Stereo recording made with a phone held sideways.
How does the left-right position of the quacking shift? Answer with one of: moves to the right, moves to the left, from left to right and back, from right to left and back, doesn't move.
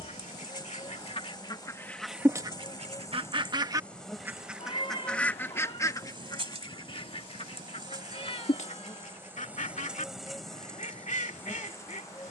from left to right and back.